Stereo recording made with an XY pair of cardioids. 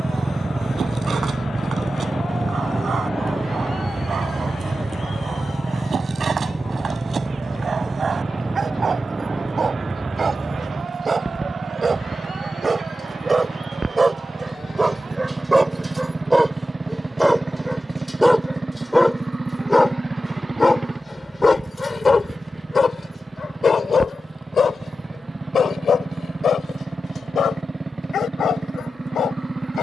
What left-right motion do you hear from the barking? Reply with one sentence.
You can hear the barking move to the left.